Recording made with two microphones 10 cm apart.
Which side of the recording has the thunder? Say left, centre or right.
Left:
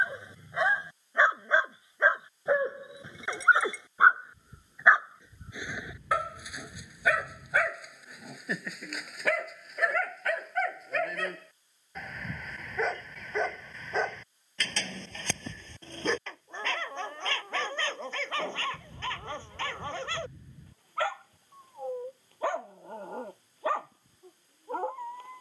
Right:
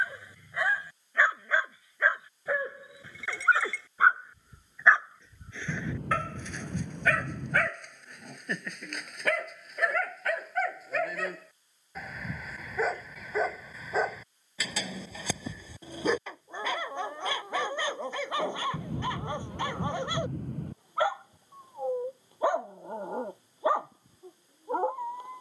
right.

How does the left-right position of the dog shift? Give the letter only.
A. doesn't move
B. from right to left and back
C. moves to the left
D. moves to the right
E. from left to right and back
D.